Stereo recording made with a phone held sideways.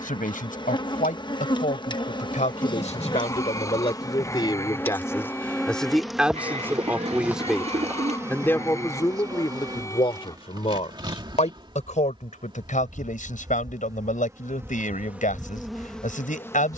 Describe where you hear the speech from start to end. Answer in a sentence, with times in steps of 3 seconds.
You can hear the speech on the left from 0 s, in the centre from 6 s and on the left from 9 s.